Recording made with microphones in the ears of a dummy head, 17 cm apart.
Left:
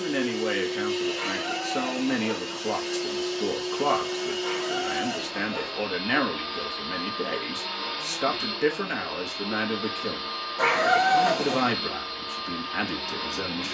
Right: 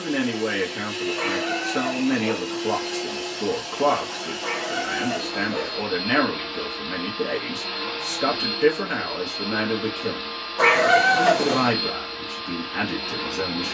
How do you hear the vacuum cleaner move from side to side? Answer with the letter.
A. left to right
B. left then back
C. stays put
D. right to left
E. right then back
C.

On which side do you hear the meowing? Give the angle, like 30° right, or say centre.
10° right.